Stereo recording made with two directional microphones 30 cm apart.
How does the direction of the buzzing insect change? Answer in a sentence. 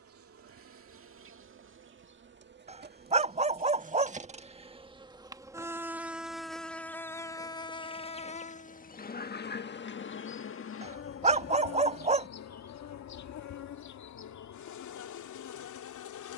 You can hear the buzzing insect go from the right side to the left.